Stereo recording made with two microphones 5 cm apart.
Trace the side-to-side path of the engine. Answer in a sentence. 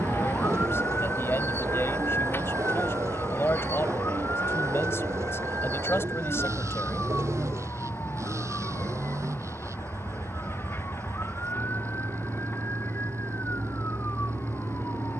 In this clip you hear the engine stay in one place.